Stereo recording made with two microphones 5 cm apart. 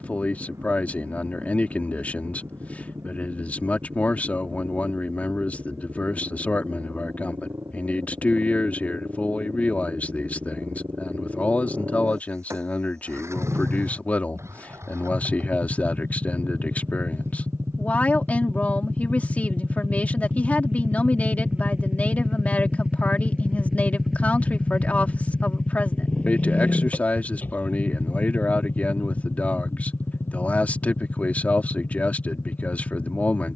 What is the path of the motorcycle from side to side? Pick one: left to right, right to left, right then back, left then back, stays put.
right to left.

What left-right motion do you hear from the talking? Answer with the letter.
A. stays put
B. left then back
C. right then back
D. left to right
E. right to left
A.